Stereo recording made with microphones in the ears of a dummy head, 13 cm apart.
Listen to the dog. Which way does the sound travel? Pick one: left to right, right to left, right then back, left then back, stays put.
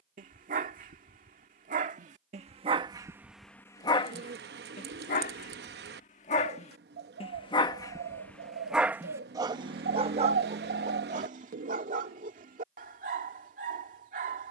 left then back.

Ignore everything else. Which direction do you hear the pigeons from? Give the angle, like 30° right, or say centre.
80° right.